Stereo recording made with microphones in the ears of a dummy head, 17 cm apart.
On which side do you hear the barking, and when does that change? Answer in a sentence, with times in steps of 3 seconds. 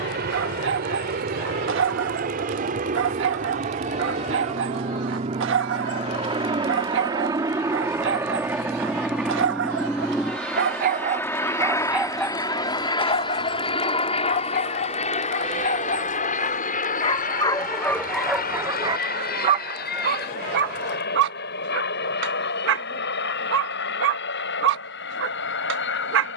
You can hear the barking on the right from 0 s, on the left from 12 s and on the right from 18 s.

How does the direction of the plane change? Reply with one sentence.
In this clip you hear the plane travel towards the left.